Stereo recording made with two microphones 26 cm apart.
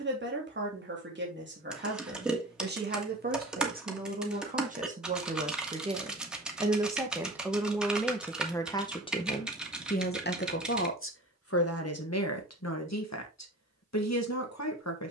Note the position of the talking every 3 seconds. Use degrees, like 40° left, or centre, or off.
40° right, 30° right, centre, 40° left, 70° left.